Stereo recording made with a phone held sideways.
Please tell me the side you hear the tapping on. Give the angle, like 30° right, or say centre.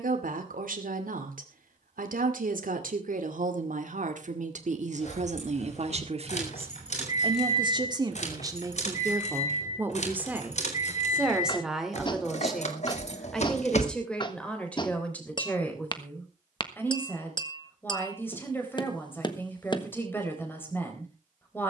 30° left.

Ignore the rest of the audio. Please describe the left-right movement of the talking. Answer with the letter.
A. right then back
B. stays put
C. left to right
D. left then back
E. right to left
E.